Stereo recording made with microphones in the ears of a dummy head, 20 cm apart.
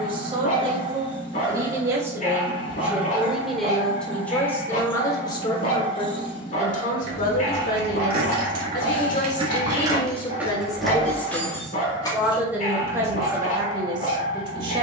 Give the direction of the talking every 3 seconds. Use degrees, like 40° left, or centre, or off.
20° right, 10° left, 40° left, 20° left, 20° right.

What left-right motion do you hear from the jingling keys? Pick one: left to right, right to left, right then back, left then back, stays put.
right to left.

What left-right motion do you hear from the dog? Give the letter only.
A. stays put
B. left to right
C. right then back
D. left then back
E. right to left
A.